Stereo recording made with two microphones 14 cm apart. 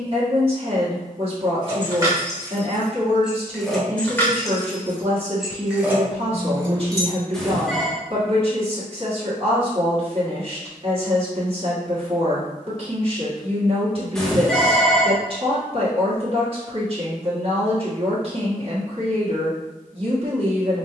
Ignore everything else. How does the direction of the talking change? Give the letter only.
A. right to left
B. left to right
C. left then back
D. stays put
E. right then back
D.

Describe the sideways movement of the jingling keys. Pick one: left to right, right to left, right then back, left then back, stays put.
left then back.